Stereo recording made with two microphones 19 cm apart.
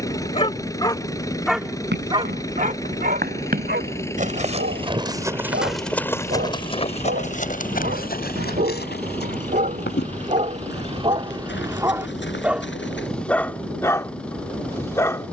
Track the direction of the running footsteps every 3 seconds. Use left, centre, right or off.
right, right, left, left, left.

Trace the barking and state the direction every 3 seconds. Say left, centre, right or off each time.
centre, right, right, right, centre.